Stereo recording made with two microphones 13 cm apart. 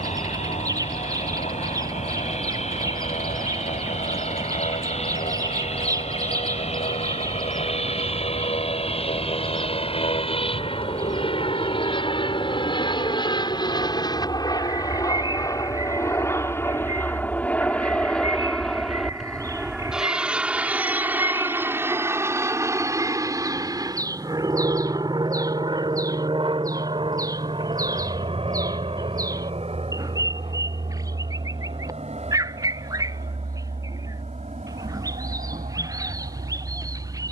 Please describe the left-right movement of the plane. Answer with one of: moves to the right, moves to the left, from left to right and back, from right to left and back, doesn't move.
moves to the right.